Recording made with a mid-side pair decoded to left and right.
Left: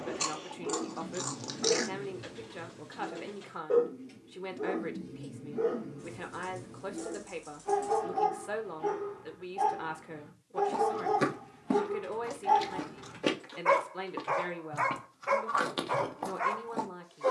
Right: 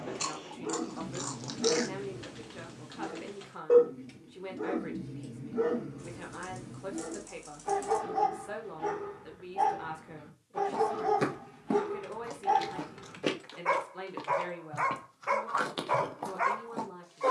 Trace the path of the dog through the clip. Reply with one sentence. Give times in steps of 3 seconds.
In this clip you hear the dog on the right from 0 s, in the centre from 12 s and on the right from 15 s.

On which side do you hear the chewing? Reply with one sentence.
You can hear the chewing in the centre.